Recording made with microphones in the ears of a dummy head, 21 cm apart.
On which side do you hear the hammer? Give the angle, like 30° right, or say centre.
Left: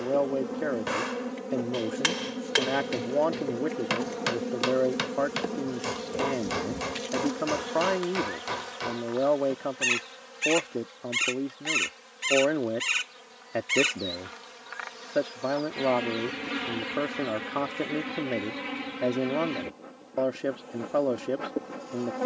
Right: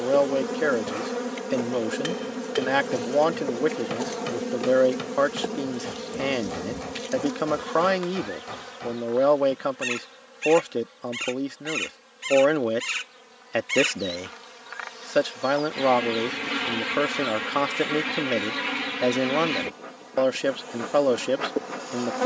50° left.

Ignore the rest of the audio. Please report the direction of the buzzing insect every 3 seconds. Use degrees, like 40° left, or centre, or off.
40° right, 20° right, centre, 20° left, 10° left, 20° right, 50° right, 50° right.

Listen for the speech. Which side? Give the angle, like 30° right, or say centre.
70° right.